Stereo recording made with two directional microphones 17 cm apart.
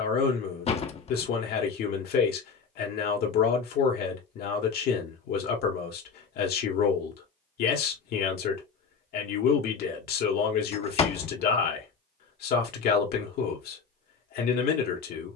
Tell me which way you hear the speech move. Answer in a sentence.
You can hear the speech stay put.